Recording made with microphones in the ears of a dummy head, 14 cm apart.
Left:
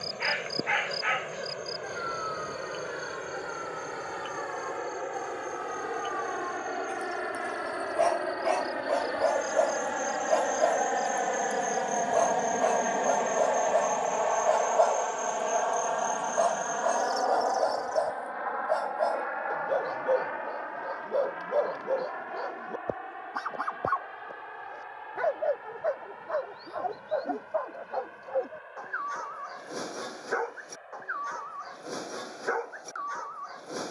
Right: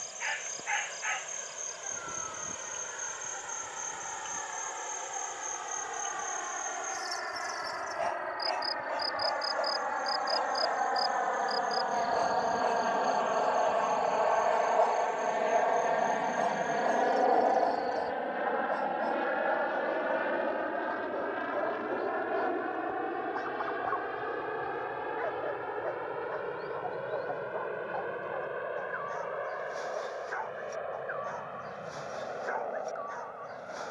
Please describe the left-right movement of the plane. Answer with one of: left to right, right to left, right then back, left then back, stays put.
left to right.